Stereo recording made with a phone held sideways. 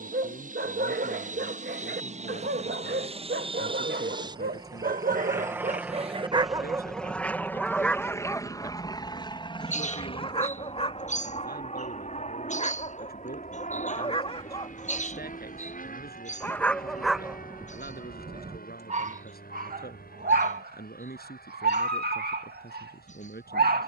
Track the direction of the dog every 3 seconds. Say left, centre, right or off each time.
right, right, centre, left, left, centre, right, right.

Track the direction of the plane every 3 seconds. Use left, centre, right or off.
right, right, centre, left, left, left, left, left.